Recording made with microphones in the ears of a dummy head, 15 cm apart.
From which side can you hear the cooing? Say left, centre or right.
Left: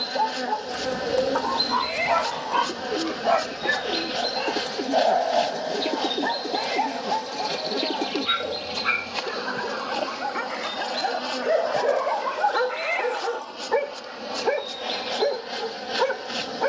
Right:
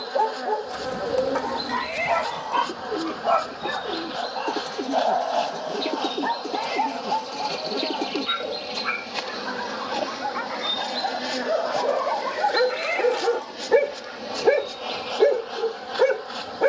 centre.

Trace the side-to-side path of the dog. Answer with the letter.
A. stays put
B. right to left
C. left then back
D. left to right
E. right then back
C.